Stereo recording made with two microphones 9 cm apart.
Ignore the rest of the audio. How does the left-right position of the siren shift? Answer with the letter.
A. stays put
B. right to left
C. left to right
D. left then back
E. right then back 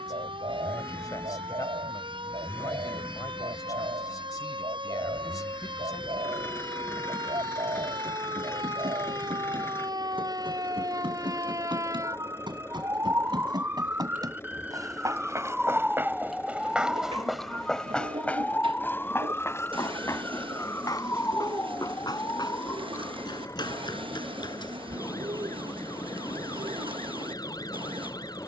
B.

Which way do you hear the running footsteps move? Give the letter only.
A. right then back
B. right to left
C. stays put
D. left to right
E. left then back
B.